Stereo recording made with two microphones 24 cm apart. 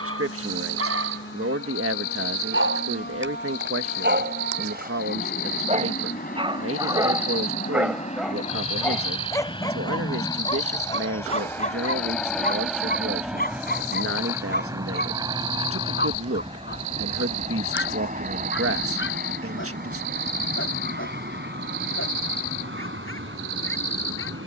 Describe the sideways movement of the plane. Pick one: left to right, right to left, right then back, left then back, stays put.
left to right.